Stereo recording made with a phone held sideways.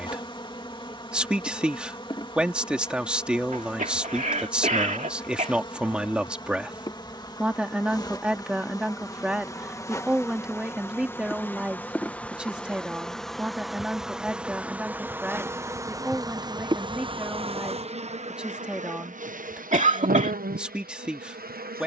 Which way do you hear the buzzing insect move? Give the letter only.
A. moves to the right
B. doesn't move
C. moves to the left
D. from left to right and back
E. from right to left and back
A.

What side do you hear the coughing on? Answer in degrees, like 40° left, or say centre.
50° right.